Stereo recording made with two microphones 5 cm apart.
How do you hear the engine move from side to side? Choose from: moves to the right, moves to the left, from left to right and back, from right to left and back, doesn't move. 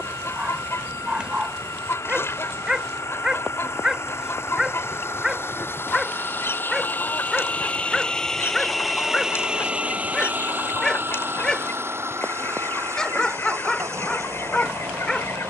moves to the right.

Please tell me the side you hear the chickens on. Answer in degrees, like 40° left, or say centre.
60° left.